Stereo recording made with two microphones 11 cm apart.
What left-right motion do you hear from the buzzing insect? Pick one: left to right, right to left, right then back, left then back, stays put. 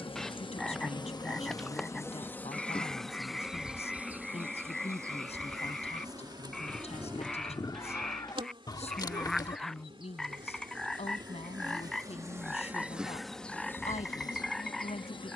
right then back.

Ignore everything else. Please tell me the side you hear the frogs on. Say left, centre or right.
centre.